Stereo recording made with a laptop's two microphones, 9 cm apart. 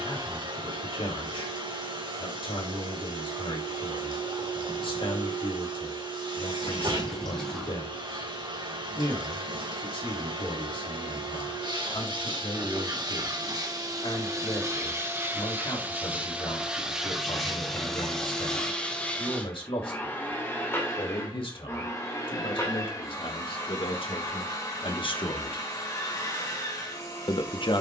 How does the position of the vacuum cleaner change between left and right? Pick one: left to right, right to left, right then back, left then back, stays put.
right to left.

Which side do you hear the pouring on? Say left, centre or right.
centre.